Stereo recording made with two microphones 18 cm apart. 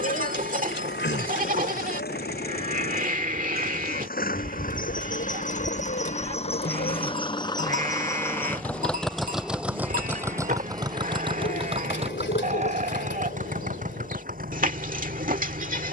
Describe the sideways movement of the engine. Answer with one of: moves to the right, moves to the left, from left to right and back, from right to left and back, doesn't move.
moves to the right.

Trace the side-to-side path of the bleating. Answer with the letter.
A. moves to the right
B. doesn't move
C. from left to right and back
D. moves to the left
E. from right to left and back
B.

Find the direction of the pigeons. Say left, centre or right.
left.